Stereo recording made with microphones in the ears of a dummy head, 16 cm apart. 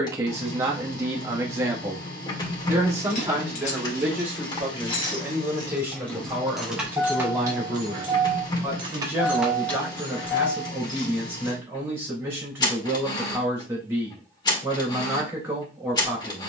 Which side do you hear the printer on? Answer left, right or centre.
left.